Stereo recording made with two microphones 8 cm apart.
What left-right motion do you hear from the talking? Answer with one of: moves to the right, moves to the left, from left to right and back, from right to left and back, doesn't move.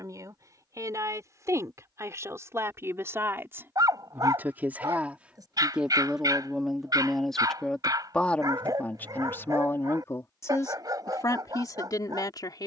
moves to the left.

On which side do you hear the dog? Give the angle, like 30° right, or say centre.
50° right.